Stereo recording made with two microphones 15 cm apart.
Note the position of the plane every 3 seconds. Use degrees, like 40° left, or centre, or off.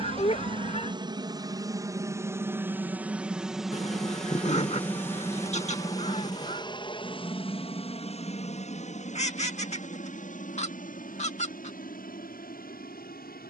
20° right, 10° left, 30° left, 50° left, 60° left.